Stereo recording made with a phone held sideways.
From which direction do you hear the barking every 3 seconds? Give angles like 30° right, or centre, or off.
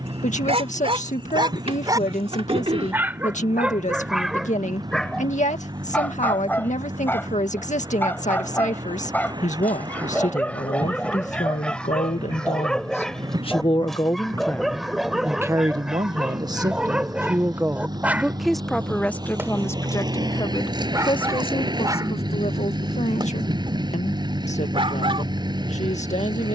30° right, centre, 10° left, 10° left, centre, centre, 10° right, 30° right, 40° right.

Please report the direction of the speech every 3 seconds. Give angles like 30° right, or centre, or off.
50° left, 50° left, 50° left, 50° left, 30° left, 20° right, 10° left, 40° left, 50° left.